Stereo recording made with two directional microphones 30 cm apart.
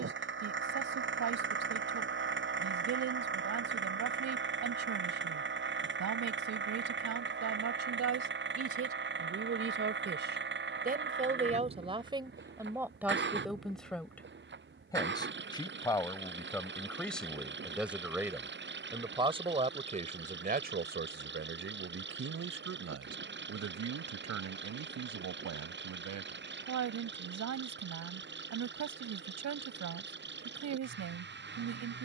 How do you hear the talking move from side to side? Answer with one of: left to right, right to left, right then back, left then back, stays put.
left then back.